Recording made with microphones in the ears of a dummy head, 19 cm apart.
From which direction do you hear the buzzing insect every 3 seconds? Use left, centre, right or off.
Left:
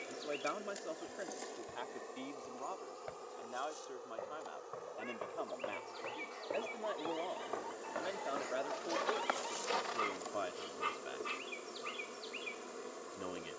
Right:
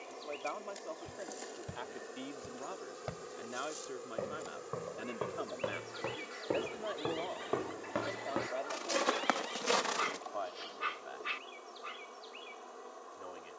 centre, right, centre, left, left.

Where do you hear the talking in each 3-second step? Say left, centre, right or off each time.
centre, right, centre, left, left.